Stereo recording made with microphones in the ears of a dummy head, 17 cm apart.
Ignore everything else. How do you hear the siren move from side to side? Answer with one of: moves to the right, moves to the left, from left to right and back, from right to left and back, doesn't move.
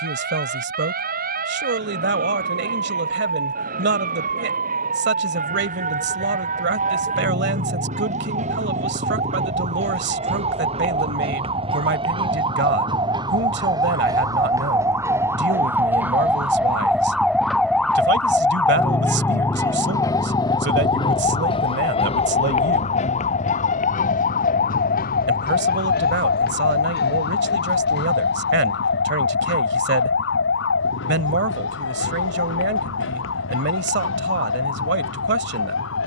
moves to the left.